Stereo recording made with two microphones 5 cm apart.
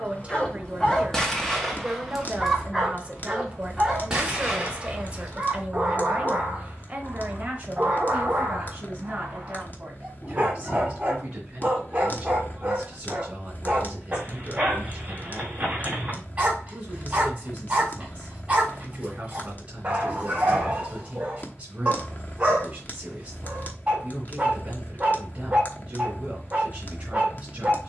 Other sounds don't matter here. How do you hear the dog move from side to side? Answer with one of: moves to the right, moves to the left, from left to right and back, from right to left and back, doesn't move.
moves to the right.